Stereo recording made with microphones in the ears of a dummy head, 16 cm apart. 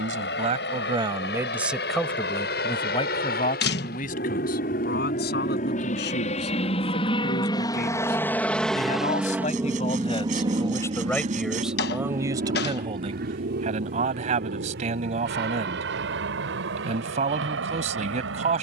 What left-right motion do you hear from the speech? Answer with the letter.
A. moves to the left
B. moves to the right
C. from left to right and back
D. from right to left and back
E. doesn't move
D.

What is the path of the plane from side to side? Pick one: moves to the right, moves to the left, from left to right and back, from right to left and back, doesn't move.
moves to the right.